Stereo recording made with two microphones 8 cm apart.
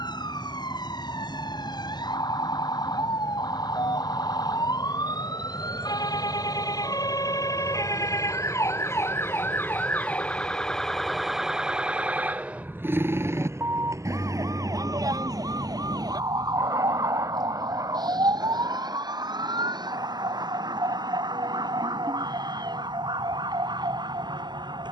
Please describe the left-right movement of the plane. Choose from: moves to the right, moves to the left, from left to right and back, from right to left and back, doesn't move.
moves to the right.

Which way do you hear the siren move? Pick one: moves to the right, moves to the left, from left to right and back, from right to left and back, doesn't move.
moves to the right.